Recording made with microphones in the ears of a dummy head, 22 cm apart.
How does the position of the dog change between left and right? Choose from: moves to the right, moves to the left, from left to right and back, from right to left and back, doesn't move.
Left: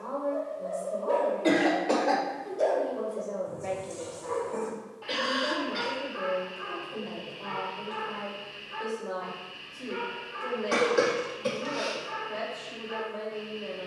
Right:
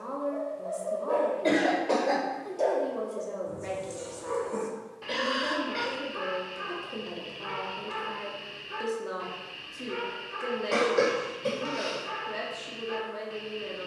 moves to the right.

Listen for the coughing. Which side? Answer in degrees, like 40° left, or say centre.
10° left.